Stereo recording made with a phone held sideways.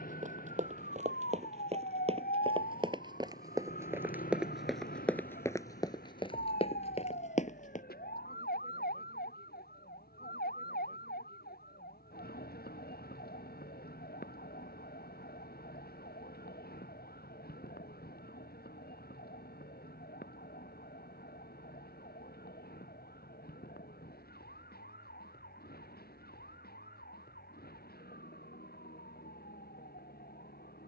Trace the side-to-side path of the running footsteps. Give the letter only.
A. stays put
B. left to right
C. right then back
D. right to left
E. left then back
D.